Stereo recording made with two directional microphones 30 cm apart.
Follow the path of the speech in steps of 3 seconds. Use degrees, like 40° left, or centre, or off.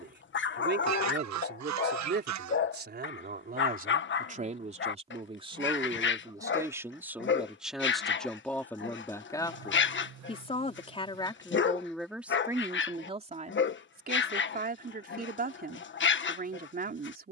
30° right, 20° right, centre, 10° left, 20° right, 30° right.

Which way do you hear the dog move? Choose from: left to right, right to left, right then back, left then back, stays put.
stays put.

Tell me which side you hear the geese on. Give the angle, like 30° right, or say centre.
60° right.